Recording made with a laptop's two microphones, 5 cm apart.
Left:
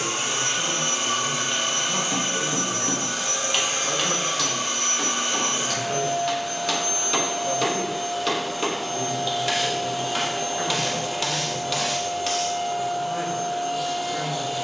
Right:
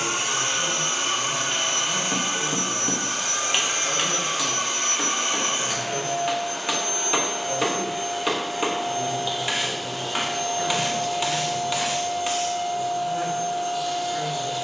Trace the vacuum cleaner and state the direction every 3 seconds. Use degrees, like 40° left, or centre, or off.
60° right, 50° right, 30° right, 10° left, 50° left.